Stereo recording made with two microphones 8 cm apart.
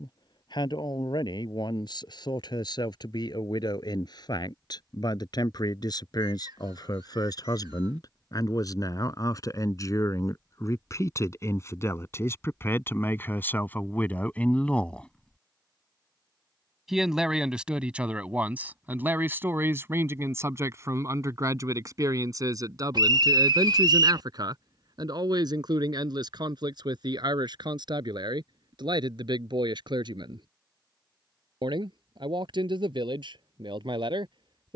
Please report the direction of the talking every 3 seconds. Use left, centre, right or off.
left, left, left, left, left, centre, right, right, right, right, right, right.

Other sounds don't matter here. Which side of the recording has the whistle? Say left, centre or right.
right.